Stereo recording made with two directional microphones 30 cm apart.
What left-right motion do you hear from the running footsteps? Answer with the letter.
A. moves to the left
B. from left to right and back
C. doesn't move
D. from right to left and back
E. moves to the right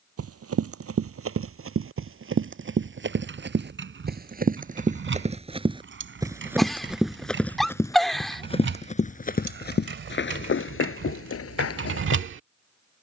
A.